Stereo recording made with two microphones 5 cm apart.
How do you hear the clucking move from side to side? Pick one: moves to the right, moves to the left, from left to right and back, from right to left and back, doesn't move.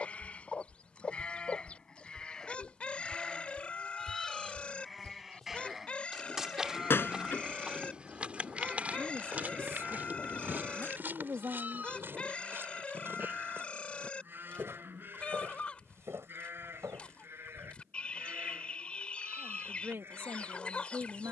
doesn't move.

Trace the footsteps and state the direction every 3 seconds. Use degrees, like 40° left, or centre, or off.
20° left, centre, 20° right, 40° right, 50° right, 60° right, off.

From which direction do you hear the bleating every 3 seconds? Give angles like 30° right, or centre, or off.
20° left, centre, 20° right, 30° right, 40° right, 50° right, 50° right.